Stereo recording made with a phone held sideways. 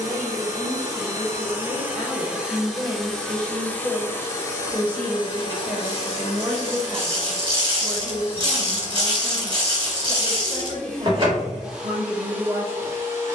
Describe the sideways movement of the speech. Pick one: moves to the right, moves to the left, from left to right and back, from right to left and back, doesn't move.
moves to the right.